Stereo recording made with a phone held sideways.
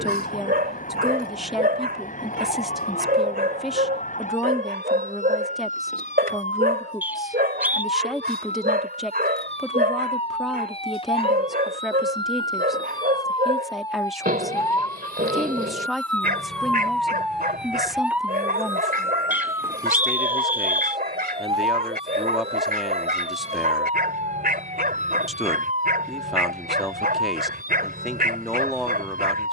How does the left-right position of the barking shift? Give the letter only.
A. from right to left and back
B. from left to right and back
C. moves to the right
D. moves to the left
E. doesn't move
E.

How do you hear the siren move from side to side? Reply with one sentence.
You can hear the siren travel towards the right.